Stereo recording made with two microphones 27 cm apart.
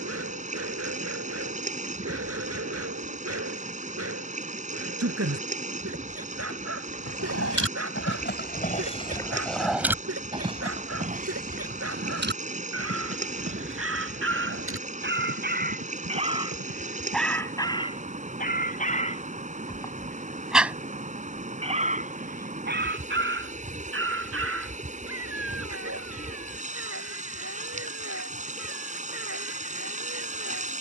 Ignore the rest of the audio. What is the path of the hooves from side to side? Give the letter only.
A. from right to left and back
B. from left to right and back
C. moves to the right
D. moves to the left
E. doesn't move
C.